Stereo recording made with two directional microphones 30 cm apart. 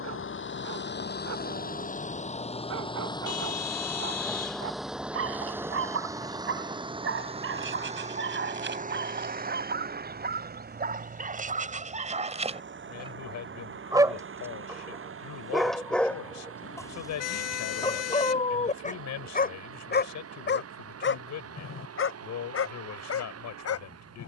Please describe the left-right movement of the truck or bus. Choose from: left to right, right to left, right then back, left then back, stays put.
left to right.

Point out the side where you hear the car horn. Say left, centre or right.
left.